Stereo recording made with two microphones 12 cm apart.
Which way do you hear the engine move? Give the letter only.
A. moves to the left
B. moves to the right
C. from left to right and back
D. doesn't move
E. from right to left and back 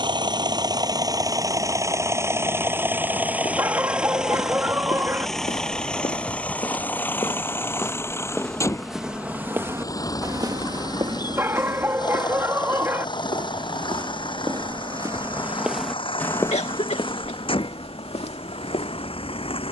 A.